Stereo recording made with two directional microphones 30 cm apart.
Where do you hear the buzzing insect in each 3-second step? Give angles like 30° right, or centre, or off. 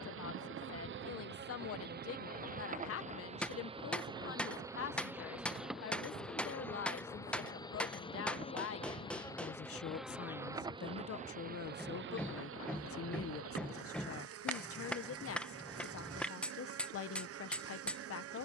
40° right, 10° right, 10° left, 10° right, 50° right, 50° right.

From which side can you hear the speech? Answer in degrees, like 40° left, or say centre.
50° left.